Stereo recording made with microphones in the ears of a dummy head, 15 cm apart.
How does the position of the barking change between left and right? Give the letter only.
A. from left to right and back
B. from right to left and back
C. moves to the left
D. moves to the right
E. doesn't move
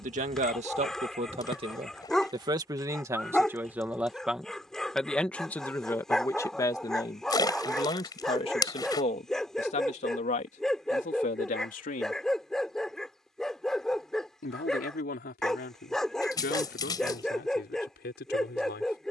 E.